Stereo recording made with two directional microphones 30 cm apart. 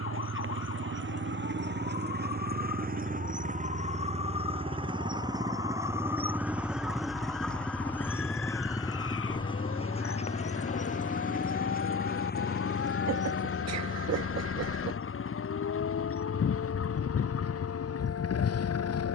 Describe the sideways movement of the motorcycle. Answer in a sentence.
You can hear the motorcycle travel towards the left.